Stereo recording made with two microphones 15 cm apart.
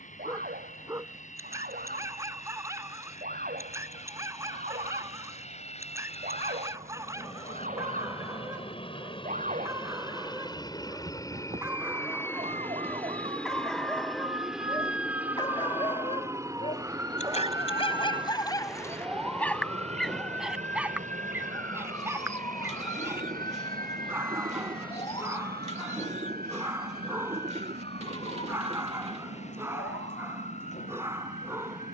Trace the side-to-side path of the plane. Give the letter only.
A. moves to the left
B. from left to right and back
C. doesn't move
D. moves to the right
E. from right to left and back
D.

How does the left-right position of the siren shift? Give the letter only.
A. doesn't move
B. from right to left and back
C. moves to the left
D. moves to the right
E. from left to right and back
C.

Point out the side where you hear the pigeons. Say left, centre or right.
right.